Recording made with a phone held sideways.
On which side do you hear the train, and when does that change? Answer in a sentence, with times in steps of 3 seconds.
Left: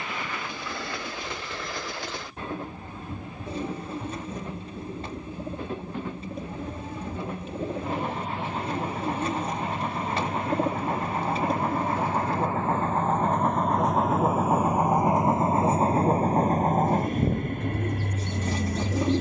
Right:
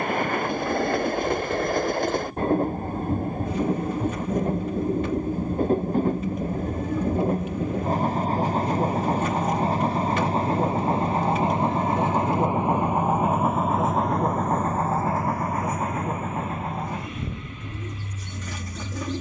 You can hear the train on the right from 0 s, in the centre from 12 s and on the left from 15 s.